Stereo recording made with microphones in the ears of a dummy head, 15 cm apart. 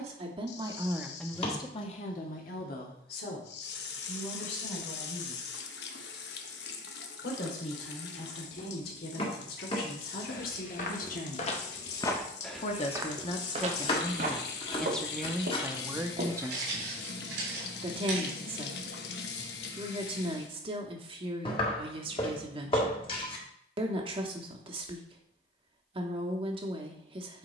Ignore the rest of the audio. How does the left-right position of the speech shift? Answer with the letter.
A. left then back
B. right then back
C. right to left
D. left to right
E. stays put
A.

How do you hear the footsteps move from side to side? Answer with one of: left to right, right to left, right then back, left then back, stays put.
left to right.